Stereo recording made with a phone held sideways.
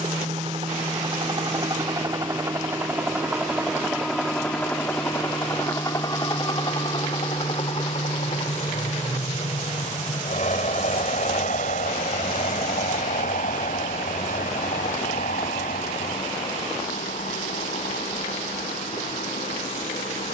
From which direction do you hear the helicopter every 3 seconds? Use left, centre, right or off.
right, centre, left, left, left, left, left.